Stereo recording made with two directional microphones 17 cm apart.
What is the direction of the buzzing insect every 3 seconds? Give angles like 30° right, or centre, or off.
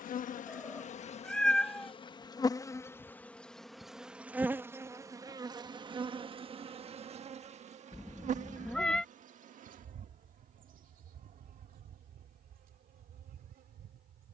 40° left, 10° right, 40° right, 50° right, 60° right.